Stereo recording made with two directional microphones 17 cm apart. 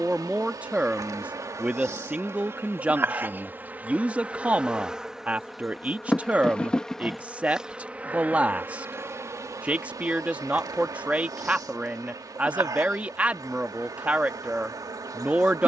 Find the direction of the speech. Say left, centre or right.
centre.